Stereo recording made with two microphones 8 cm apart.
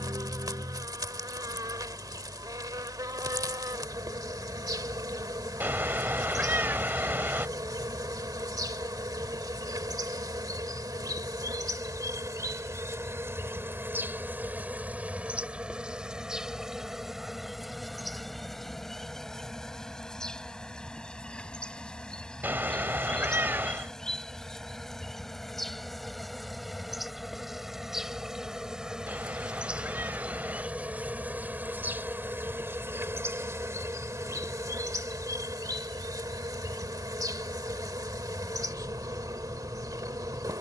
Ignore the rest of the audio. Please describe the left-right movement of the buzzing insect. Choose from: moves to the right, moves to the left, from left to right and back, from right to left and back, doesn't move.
from right to left and back.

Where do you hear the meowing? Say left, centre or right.
right.